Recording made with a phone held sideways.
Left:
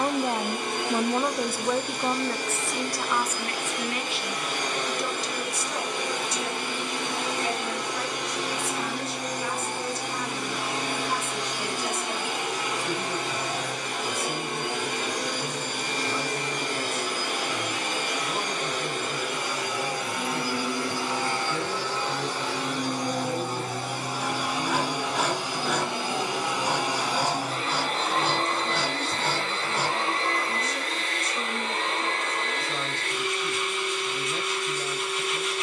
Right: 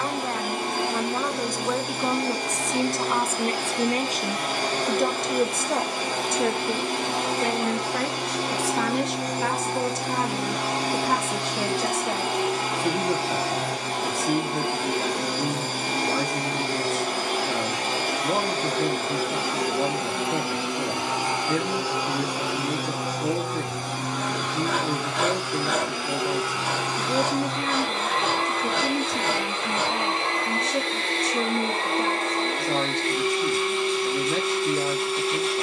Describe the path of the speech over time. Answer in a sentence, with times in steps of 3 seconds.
In this clip you hear the speech in the centre from 0 s and on the right from 3 s.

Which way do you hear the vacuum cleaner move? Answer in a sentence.
In this clip you hear the vacuum cleaner go left and come back.